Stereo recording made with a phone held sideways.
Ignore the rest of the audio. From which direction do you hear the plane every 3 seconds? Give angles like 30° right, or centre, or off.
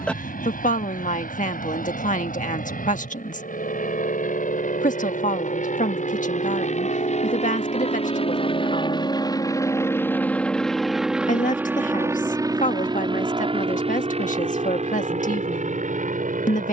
80° left, 70° left, 50° left, 10° left, 30° right, 50° right.